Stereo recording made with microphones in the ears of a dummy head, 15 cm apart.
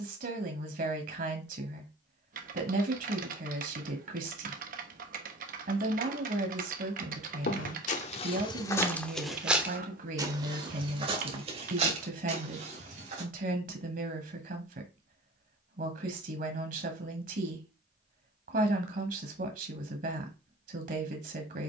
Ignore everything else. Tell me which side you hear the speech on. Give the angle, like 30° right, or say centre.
50° right.